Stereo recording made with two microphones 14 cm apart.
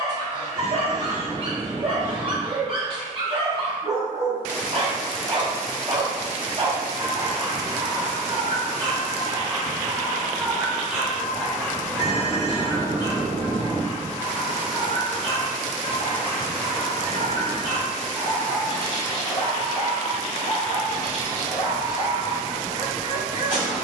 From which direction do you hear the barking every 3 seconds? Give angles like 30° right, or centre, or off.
40° right, 40° right, 40° right, 10° right, 30° left, 60° left, 60° left, 60° left.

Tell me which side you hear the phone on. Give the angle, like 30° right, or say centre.
60° right.